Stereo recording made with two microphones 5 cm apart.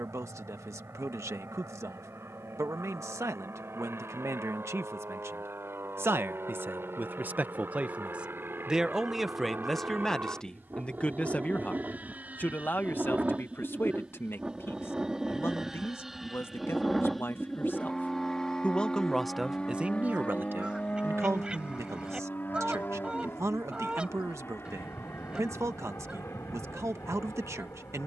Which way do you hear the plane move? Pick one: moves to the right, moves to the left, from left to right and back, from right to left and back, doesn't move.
moves to the left.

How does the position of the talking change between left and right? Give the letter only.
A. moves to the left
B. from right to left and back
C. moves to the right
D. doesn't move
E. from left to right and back
B.